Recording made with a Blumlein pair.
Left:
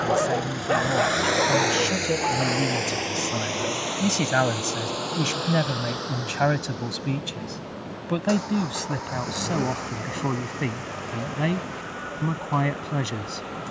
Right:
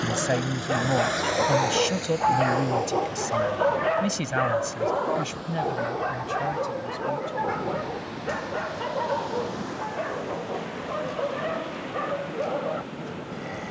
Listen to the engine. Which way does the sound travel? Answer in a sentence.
In this clip you hear the engine go from the right side to the left.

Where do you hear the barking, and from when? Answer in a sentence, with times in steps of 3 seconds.
In this clip you hear the barking in the centre from 0 s and on the right from 3 s.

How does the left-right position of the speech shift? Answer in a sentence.
In this clip you hear the speech travel towards the left.